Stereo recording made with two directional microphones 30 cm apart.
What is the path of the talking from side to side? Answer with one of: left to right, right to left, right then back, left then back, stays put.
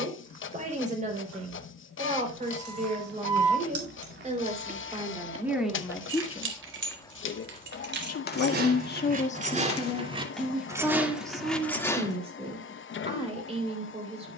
left then back.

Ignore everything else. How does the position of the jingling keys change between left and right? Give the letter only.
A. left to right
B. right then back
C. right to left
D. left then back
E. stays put
C.